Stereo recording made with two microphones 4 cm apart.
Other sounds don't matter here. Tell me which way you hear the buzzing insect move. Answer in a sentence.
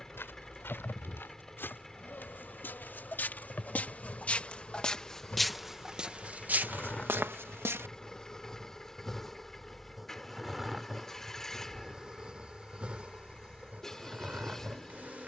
You can hear the buzzing insect travel towards the right.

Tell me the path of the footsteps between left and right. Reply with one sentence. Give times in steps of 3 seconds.
In this clip you hear the footsteps on the left from 0 s, on the right from 6 s and not at all from 9 s.